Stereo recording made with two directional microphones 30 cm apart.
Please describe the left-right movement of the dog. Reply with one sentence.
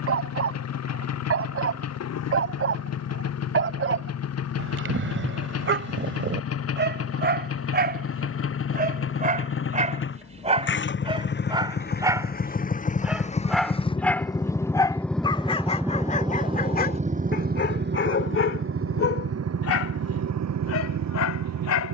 You can hear the dog move to the left.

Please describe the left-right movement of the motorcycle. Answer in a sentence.
You can hear the motorcycle go from the left side to the right.